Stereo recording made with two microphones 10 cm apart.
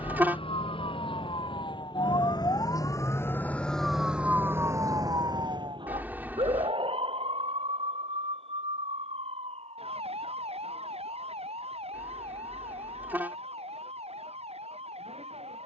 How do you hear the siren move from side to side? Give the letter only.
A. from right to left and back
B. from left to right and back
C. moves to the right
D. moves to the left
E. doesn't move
C.